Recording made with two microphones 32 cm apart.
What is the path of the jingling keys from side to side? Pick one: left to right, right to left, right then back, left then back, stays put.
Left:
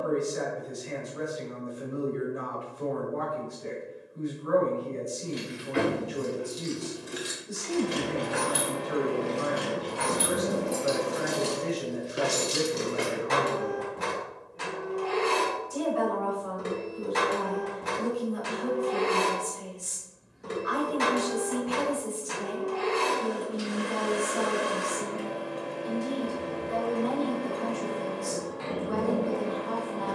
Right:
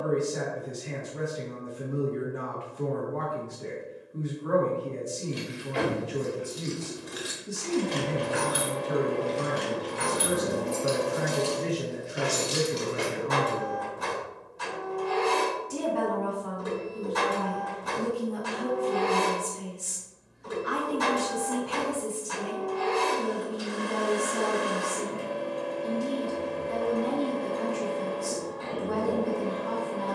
right then back.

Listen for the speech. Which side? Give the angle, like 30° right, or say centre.
80° right.